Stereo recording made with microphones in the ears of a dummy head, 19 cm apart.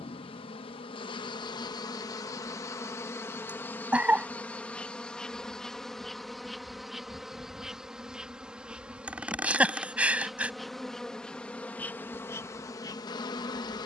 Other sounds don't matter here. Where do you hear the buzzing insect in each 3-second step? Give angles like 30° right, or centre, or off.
20° left, 10° left, centre, centre, 20° left.